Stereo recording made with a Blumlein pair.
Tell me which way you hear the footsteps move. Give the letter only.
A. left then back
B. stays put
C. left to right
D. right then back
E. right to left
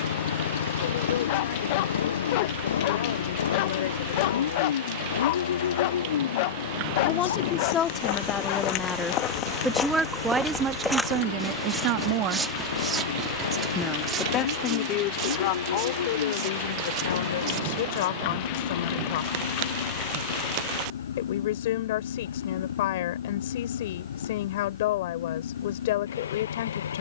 C.